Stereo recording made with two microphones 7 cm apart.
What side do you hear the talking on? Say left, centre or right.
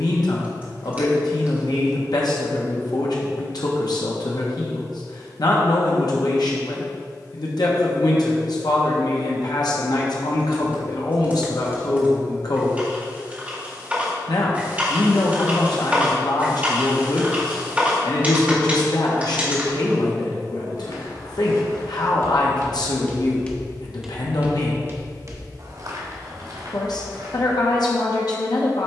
left.